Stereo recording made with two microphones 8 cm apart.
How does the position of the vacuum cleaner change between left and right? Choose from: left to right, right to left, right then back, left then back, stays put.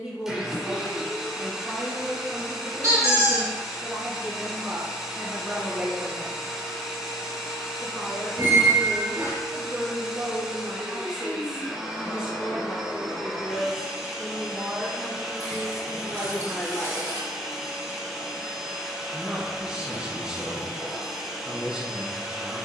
stays put.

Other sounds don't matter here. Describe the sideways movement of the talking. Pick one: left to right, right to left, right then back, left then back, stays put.
stays put.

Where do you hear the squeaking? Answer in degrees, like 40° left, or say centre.
50° right.